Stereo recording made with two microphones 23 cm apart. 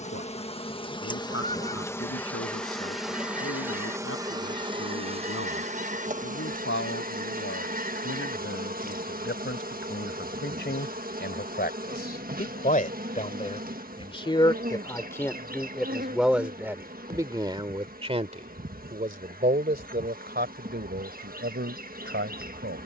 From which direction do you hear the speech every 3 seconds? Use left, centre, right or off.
left, left, left, left, left, centre, right, right.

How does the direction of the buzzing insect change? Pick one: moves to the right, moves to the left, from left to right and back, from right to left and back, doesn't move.
moves to the right.